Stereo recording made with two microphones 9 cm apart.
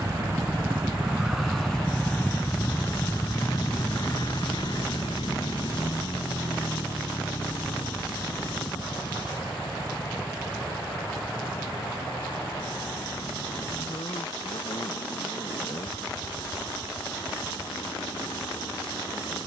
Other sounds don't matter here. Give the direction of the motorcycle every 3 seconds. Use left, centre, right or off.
centre, left, left, left, left, left, left.